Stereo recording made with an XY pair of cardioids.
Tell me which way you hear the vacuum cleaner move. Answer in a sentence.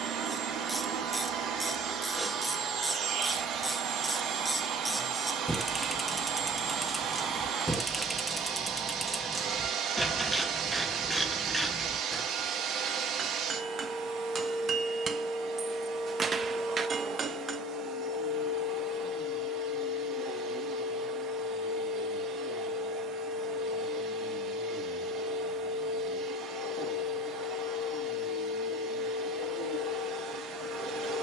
In this clip you hear the vacuum cleaner stay put.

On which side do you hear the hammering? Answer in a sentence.
In this clip you hear the hammering on the right.